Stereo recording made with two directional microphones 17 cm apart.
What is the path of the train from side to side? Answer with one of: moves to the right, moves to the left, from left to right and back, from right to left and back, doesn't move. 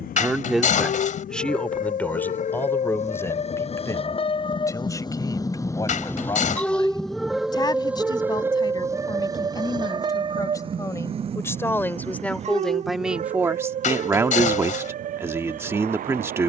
moves to the right.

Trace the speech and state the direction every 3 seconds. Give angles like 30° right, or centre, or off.
centre, 20° left, 20° left, 20° left, 10° right, 20° right.